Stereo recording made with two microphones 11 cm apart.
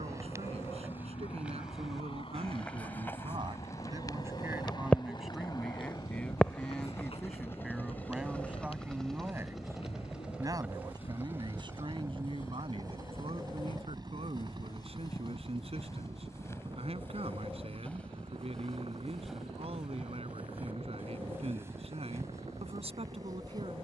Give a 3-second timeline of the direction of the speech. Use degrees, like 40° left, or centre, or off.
70° right, 20° right, centre, 40° right, 60° right, 70° right, 70° right, 70° right.